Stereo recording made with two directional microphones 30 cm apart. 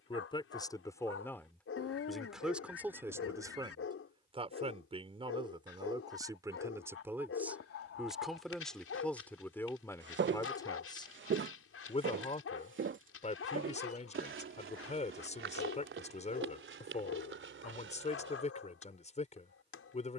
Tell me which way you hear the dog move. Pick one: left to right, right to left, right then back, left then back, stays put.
stays put.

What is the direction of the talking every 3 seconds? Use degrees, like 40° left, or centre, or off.
10° left, 10° right, centre, 10° left, 20° left, 20° left, 20° left.